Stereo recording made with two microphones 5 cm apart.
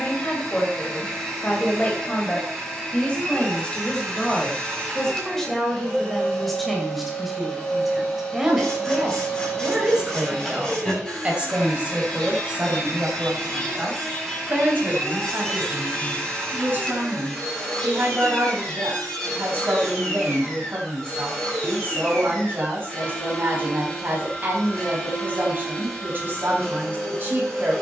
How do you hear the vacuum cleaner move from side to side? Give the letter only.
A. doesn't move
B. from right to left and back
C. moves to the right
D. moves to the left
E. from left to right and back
A.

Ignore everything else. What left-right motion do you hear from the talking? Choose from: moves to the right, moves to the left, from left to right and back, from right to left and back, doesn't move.
moves to the right.